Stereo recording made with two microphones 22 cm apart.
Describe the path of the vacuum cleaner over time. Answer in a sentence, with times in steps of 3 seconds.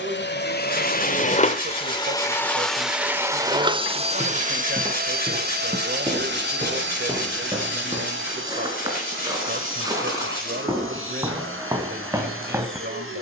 You can hear the vacuum cleaner on the left from 0 s and on the right from 3 s.